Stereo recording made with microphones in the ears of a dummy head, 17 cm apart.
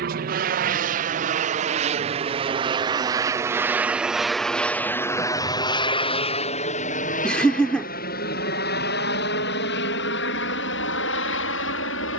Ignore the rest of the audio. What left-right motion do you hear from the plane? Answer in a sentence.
In this clip you hear the plane go from the right side to the left.